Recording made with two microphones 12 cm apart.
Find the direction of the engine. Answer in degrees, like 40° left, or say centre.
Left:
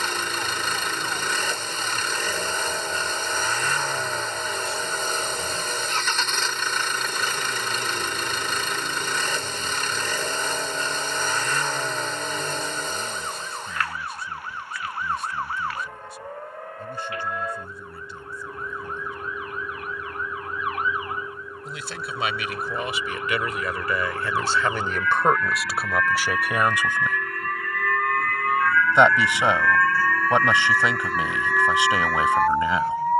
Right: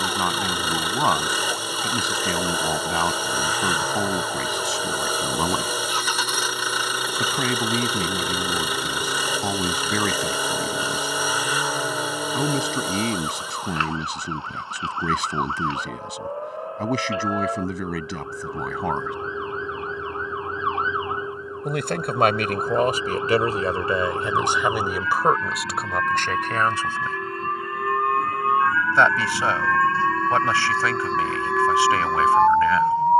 10° right.